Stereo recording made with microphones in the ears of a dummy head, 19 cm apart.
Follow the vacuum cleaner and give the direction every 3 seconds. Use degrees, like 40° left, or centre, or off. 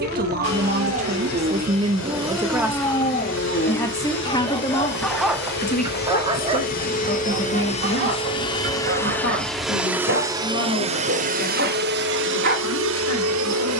60° left, 50° left, 30° left, 20° right, 60° right.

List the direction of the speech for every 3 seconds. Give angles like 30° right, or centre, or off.
30° right, 20° left, 50° left, 60° left, 70° left.